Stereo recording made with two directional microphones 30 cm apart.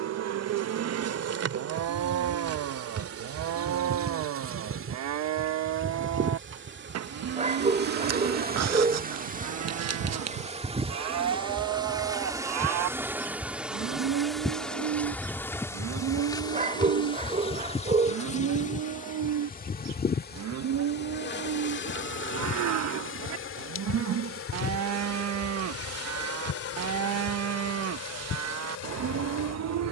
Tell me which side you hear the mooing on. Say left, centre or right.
right.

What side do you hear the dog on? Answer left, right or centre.
right.